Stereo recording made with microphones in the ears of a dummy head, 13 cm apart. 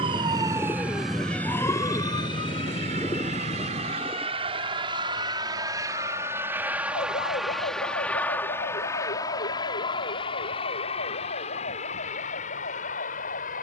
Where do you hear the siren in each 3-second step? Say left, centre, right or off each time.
centre, left, left, left, left.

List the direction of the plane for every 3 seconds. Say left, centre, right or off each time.
right, right, centre, left, left.